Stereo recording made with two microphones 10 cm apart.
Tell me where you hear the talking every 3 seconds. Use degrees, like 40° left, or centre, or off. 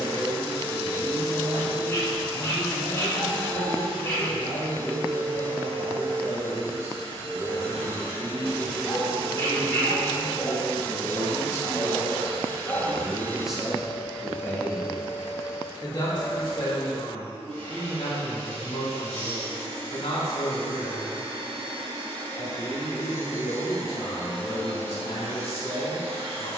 40° right, 40° right, 40° right, 30° right, centre, 50° left, 70° left, 70° left, 70° left.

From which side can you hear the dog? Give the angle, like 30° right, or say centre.
30° left.